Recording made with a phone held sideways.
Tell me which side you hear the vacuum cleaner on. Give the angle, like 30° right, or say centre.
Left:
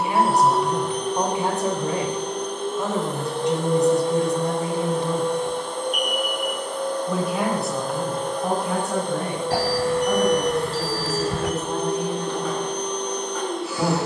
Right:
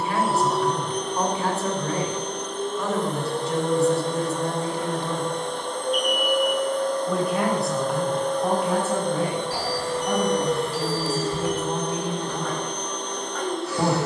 centre.